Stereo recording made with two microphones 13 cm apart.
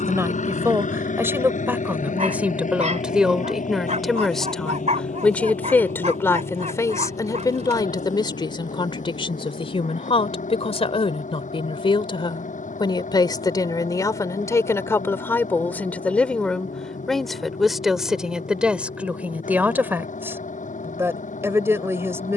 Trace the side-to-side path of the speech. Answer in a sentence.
In this clip you hear the speech move from right to left and back again.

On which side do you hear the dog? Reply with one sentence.
You can hear the dog on the right.